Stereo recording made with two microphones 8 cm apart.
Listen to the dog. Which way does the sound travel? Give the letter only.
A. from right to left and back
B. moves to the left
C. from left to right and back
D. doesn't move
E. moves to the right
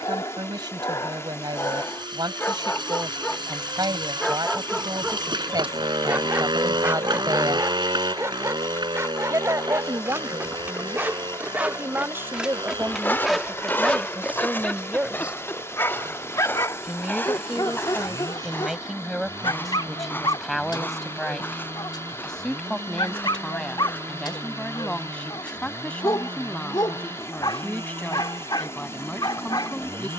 C.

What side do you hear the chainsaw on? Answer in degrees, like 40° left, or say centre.
70° right.